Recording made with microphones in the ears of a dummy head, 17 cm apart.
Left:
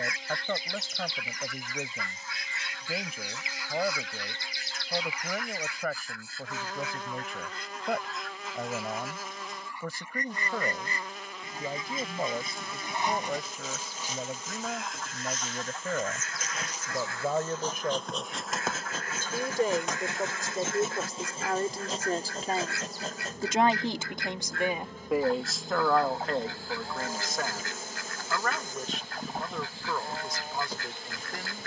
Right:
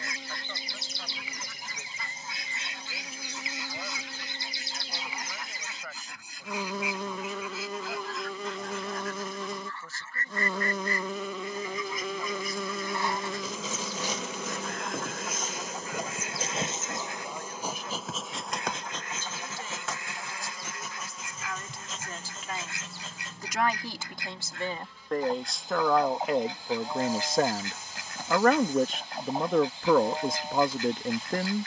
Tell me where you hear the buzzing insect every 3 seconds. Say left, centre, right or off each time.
right, right, right, right, right, right, centre, left, left, left, left.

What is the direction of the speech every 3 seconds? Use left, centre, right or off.
left, left, left, left, left, left, left, left, centre, right, right.